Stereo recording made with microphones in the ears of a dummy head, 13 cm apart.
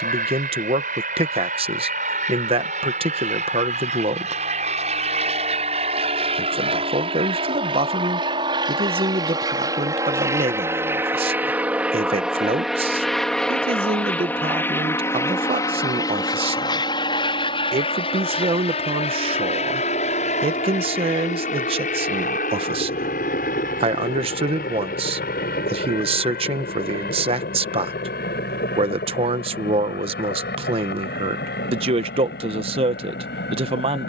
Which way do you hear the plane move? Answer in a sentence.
In this clip you hear the plane go from the right side to the left.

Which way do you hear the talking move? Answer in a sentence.
In this clip you hear the talking stay in one place.